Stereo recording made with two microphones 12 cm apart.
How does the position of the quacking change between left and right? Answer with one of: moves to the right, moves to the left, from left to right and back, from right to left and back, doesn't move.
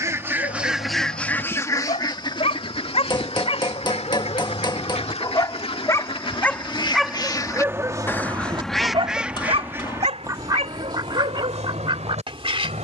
from right to left and back.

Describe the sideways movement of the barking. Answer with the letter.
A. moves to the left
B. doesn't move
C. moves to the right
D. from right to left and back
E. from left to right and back
C.